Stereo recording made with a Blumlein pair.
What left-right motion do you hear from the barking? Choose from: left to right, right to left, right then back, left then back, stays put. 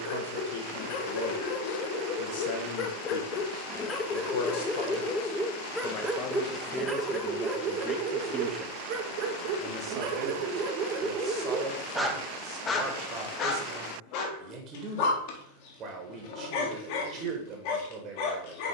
right then back.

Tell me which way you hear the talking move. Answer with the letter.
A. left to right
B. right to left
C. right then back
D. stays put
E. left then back
A.